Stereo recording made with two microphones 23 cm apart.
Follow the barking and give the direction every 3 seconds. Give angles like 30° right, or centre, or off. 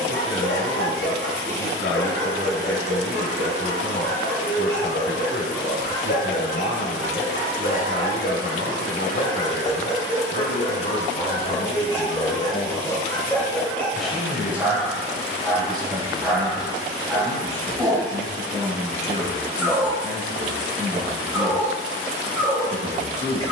50° left, 50° left, 40° left, 30° left, 10° left, centre, 10° right, 10° right.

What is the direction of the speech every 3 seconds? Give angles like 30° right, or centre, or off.
60° left, 60° left, 60° left, 50° left, 10° left, 20° right, 30° right, 30° right.